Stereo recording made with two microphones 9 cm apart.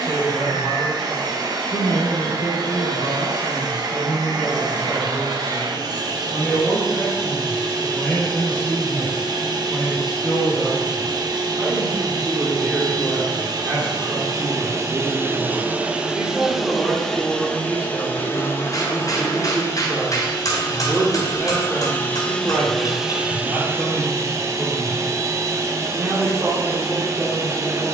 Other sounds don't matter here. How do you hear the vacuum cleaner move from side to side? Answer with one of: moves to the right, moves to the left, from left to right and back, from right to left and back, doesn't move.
from right to left and back.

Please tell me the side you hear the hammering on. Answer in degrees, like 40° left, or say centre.
40° left.